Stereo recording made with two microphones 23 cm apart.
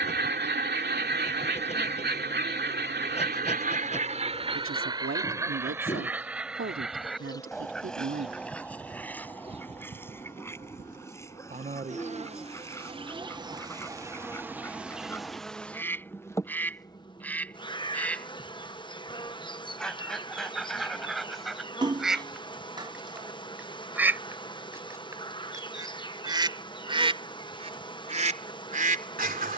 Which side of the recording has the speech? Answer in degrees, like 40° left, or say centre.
60° right.